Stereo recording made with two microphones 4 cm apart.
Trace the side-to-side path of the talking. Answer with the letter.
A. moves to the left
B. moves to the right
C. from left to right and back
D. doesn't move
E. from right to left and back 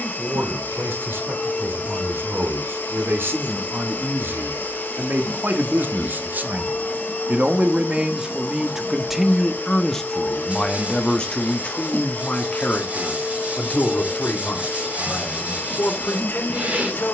A.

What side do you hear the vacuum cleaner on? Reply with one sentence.
You can hear the vacuum cleaner on the left.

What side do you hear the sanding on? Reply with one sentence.
You can hear the sanding on the right.